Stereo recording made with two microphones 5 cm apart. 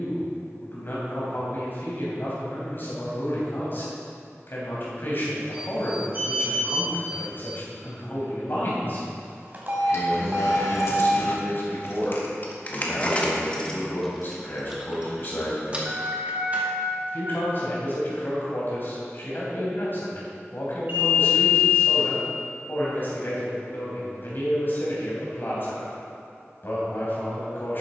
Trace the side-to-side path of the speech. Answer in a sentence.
In this clip you hear the speech stay put.